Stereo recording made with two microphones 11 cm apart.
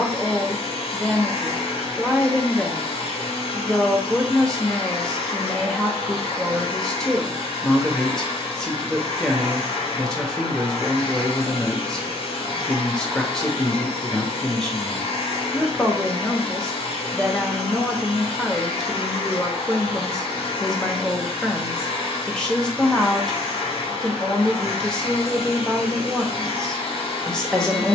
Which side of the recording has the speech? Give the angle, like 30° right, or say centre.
10° left.